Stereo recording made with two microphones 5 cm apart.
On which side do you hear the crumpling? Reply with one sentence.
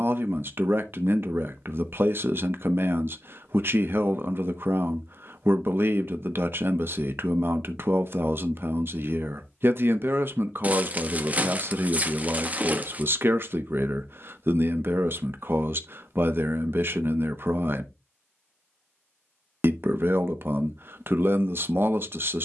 In this clip you hear the crumpling on the right.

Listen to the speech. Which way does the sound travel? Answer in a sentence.
In this clip you hear the speech stay in one place.